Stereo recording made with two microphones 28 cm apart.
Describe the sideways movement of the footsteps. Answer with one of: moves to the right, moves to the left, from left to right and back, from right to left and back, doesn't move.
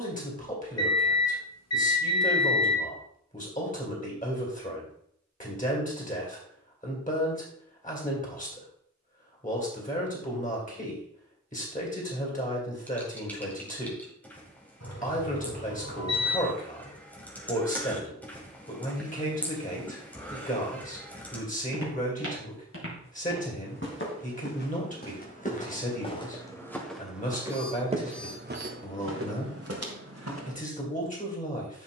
moves to the right.